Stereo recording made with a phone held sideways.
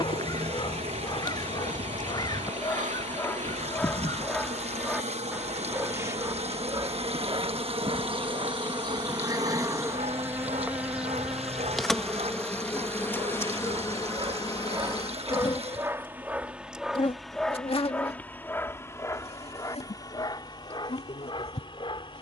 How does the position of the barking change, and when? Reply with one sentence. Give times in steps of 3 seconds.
In this clip you hear the barking on the left from 0 s, in the centre from 3 s, on the right from 6 s, in the centre from 15 s and on the left from 18 s.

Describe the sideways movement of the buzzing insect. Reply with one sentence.
In this clip you hear the buzzing insect move from right to left.